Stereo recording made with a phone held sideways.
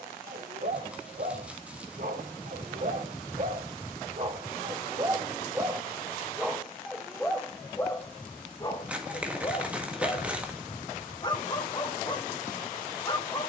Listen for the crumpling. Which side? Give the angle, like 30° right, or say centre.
10° right.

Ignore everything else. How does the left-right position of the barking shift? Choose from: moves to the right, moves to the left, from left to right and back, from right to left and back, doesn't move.
moves to the left.